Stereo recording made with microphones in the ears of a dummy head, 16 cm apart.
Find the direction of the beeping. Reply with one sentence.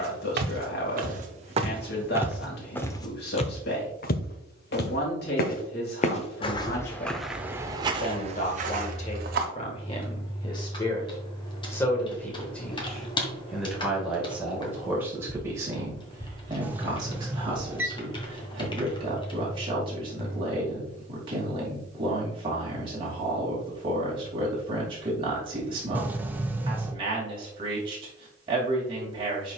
In this clip you hear the beeping in the centre.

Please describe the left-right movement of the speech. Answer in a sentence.
In this clip you hear the speech travel towards the right.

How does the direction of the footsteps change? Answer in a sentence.
You can hear the footsteps go left and come back.